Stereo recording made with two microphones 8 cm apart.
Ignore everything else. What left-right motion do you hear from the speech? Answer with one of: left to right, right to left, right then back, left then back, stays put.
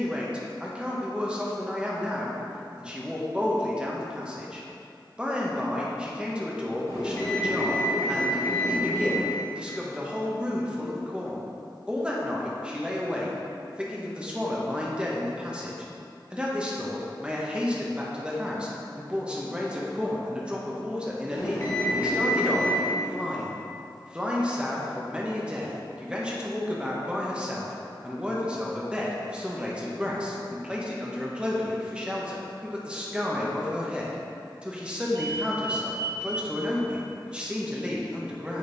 stays put.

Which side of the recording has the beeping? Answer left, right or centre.
left.